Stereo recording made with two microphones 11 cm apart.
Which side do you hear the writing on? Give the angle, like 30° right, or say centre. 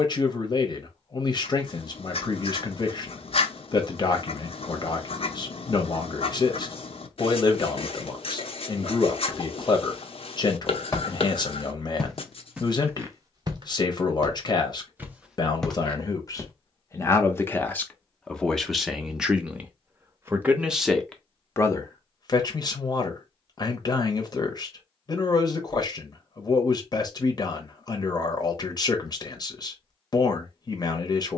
70° left.